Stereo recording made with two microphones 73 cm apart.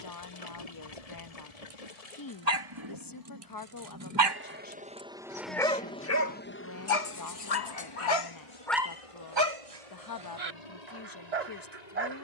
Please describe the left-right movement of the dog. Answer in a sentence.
You can hear the dog go left and come back.